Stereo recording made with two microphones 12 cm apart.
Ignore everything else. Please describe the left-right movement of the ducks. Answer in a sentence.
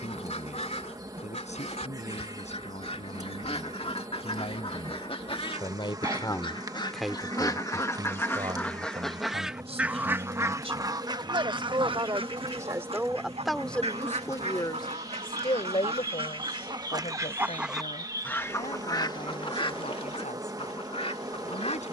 You can hear the ducks go right and come back.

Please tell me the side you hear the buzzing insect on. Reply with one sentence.
You can hear the buzzing insect on the right.